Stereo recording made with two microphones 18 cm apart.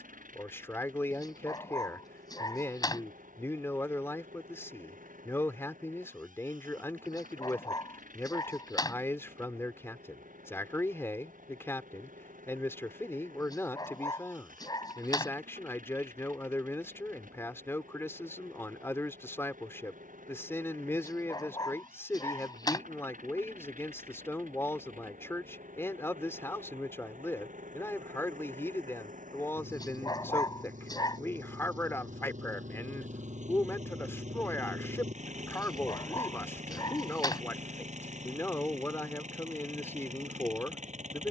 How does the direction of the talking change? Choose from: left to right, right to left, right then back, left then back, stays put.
stays put.